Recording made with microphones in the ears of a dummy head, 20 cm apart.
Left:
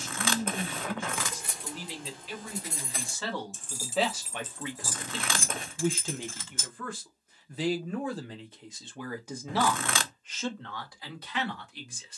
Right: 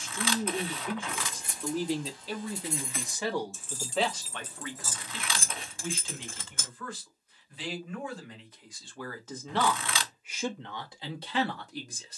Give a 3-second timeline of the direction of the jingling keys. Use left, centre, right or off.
left, centre, right, off.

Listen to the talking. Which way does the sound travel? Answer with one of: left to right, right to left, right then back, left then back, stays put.
left then back.